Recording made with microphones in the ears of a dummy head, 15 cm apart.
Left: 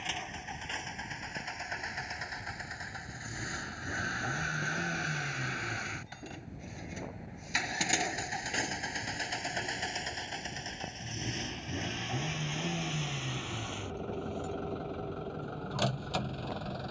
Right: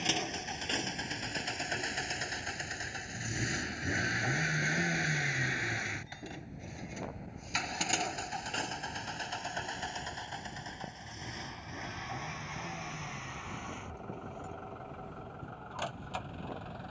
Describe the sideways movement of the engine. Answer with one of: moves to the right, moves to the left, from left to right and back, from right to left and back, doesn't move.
moves to the left.